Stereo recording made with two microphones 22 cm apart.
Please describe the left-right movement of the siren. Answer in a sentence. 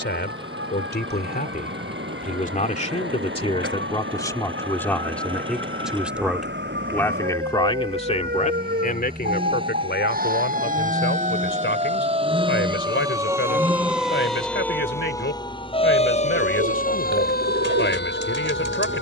You can hear the siren go from the right side to the left.